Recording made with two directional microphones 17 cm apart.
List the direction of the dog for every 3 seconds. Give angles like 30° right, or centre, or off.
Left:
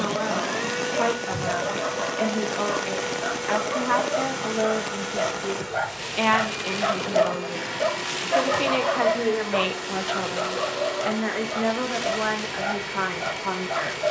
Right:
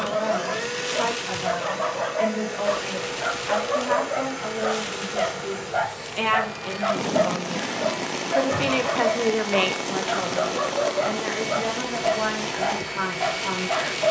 40° right, 20° right, 20° left, 10° right, 40° right.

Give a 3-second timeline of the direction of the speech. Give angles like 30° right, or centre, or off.
30° left, 20° left, 10° left, 10° left, 20° left.